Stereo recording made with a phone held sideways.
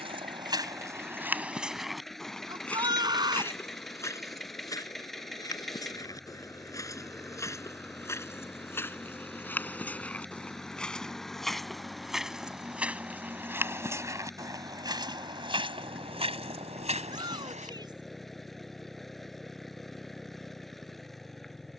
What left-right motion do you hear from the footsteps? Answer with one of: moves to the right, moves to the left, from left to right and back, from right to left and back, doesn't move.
from right to left and back.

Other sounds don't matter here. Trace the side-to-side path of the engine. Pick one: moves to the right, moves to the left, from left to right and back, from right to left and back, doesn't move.
doesn't move.